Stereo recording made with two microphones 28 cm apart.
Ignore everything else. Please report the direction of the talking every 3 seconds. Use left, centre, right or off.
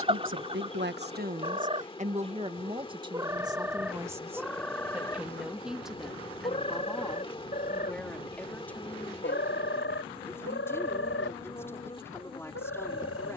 right, centre, centre, centre, centre.